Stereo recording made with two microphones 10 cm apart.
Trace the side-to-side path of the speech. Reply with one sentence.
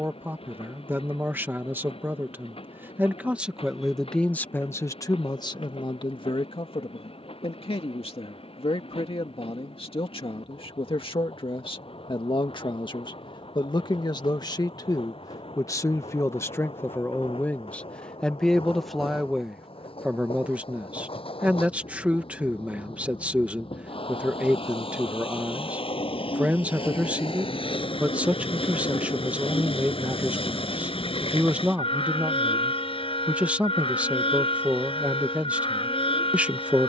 You can hear the speech move from right to left and back again.